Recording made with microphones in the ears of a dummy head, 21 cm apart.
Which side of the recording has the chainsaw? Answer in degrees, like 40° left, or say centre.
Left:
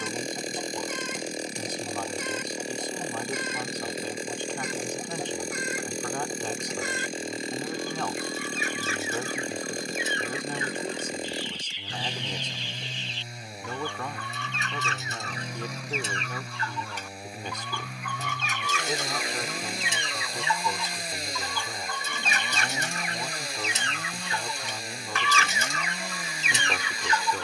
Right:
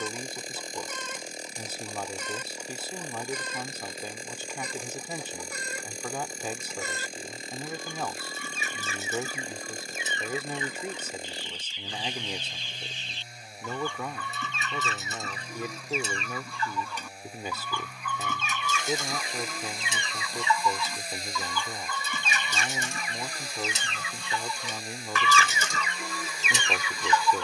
50° left.